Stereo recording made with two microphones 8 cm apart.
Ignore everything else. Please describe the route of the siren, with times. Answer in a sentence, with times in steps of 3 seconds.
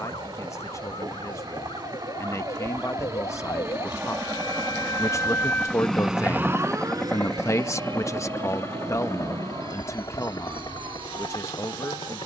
In this clip you hear the siren on the left from 0 s and on the right from 6 s.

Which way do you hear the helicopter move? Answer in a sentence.
In this clip you hear the helicopter move to the left.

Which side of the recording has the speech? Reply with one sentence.
In this clip you hear the speech on the left.